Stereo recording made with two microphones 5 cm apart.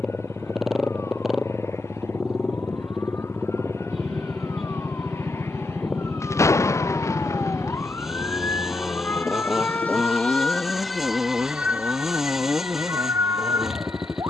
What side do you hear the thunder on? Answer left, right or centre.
left.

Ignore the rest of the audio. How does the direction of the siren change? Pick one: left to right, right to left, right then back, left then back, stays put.
left to right.